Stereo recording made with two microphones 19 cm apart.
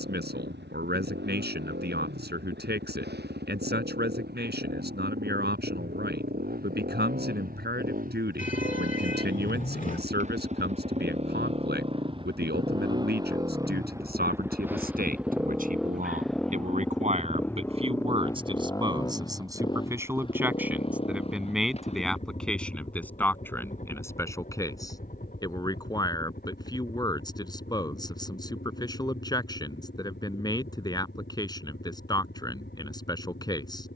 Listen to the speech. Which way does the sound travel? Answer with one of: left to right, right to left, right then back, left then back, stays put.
right to left.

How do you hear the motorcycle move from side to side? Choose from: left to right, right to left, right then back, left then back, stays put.
right to left.